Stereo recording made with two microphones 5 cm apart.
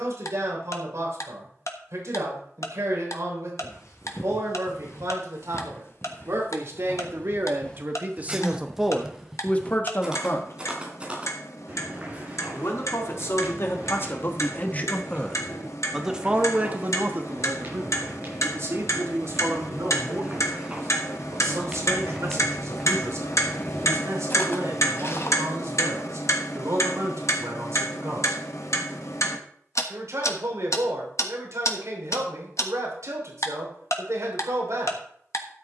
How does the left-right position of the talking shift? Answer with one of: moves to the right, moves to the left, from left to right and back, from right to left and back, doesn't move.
from right to left and back.